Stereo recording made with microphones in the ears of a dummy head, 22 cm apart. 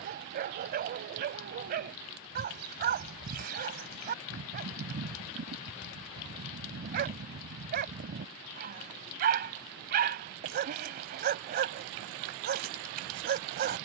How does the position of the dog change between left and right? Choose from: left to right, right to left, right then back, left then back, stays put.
stays put.